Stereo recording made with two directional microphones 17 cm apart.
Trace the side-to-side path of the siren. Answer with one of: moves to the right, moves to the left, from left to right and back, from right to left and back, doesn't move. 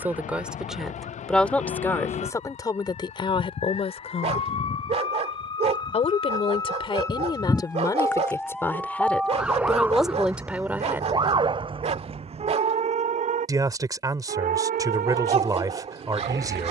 moves to the right.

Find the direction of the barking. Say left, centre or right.
right.